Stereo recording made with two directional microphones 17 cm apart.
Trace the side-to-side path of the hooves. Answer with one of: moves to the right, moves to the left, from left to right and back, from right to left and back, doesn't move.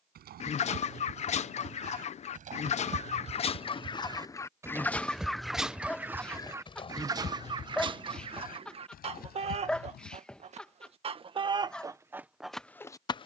moves to the left.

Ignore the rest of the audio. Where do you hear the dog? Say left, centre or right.
centre.